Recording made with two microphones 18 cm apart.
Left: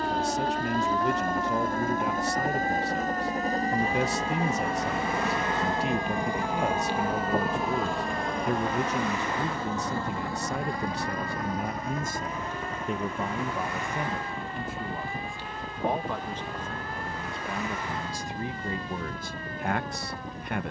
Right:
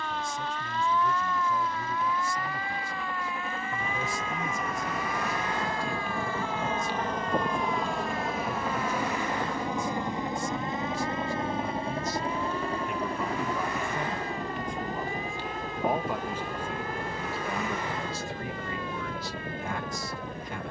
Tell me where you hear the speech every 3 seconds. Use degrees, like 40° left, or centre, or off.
70° left, 70° left, 70° left, 70° left, 20° left, centre, 50° left.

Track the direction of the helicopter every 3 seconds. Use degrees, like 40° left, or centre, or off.
50° left, 30° left, centre, 20° right, 40° right, 40° right, 50° right.